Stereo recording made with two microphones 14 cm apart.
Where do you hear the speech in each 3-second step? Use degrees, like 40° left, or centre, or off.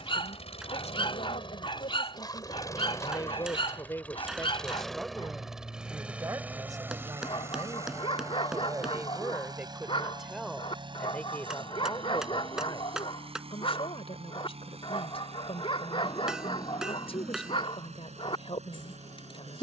50° left, 10° left, 20° right, centre, 40° left, 40° left, 40° left.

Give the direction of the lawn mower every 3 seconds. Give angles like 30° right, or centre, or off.
30° left, 10° left, 20° right, 30° right, 40° right, 50° right, 50° right.